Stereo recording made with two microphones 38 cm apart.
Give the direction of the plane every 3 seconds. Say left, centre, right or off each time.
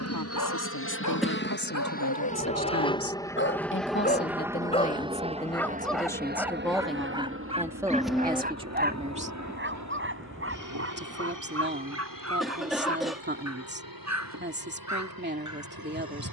left, centre, right, right, right, right.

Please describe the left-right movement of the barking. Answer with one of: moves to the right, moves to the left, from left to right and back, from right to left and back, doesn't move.
moves to the right.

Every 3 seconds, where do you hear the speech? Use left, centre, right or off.
left, left, centre, right, right, right.